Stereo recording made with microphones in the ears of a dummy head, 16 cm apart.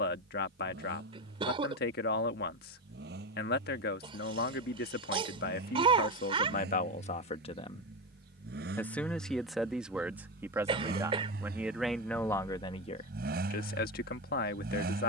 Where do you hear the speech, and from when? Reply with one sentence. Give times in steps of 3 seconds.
In this clip you hear the speech on the left from 0 s, in the centre from 9 s and on the left from 12 s.